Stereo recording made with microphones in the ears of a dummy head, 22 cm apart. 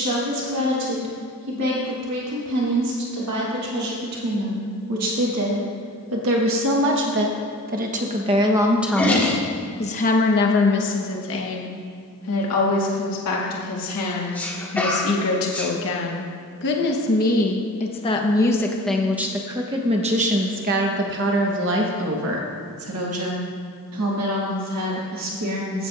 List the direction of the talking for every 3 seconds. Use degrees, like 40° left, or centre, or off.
70° right, 70° right, 40° right, 40° left, 60° left, 40° left, 10° right, 50° right, 70° right.